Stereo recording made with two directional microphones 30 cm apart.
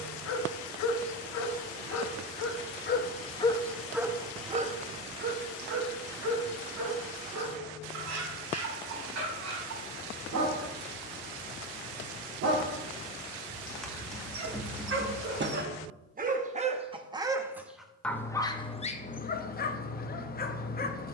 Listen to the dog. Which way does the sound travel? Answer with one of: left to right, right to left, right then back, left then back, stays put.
right then back.